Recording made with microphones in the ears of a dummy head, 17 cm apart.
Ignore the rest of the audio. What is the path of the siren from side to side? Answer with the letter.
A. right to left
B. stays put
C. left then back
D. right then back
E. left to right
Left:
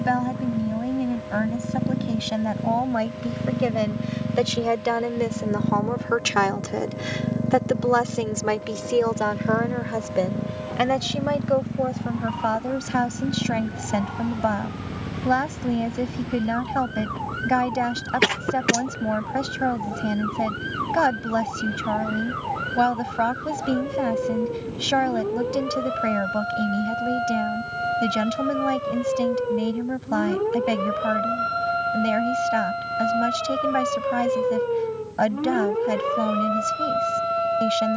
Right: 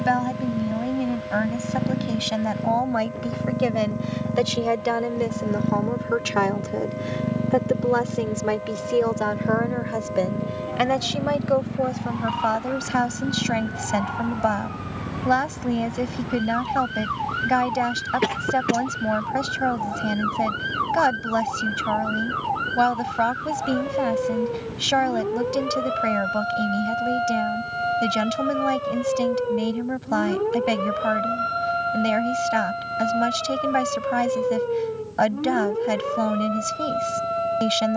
A.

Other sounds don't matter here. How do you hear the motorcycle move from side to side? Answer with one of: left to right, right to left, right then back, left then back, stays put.
right to left.